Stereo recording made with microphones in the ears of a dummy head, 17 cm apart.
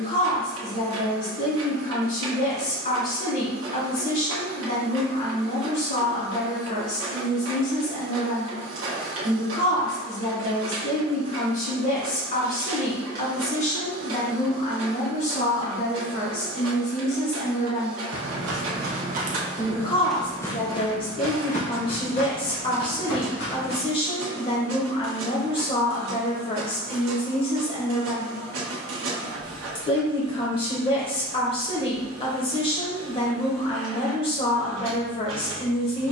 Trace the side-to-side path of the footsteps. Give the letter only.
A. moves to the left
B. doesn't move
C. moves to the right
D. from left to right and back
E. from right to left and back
A.